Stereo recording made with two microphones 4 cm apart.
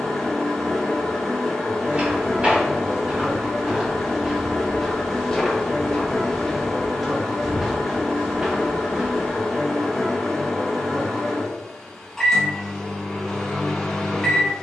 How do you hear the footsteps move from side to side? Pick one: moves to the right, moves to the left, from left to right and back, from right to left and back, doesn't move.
from right to left and back.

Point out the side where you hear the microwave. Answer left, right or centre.
centre.